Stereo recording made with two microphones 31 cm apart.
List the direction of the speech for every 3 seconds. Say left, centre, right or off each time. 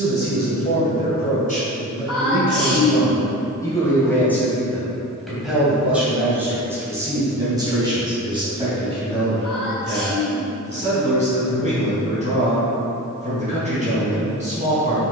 left, centre, centre, right, right.